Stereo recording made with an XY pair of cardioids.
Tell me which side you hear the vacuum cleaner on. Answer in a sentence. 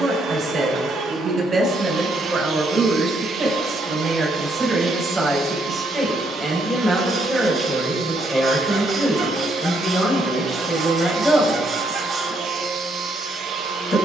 You can hear the vacuum cleaner on the right.